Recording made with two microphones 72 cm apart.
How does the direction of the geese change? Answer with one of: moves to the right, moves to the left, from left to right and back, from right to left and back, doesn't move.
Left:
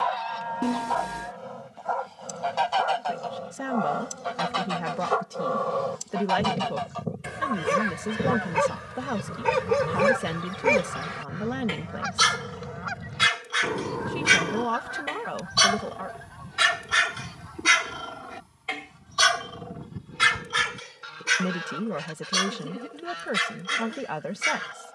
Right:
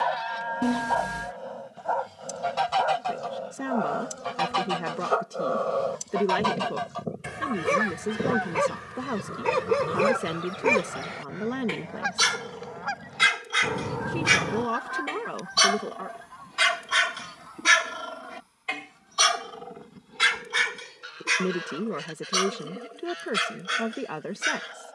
moves to the left.